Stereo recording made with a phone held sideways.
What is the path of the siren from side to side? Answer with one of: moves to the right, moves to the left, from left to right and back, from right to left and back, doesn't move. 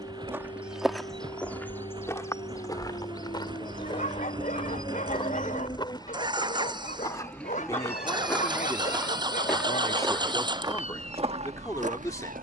moves to the right.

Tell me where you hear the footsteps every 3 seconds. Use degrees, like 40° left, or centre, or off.
10° left, 30° left, 20° left, 30° right.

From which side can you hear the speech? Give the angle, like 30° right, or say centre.
20° left.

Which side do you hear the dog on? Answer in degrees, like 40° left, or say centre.
50° left.